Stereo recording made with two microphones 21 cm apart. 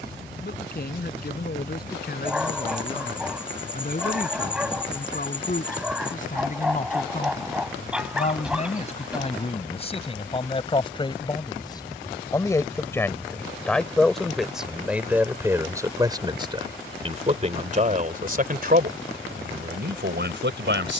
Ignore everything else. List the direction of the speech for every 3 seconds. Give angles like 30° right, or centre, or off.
50° left, 40° left, 40° left, 30° left, 10° left, 20° right, 50° right.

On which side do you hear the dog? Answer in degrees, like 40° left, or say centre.
centre.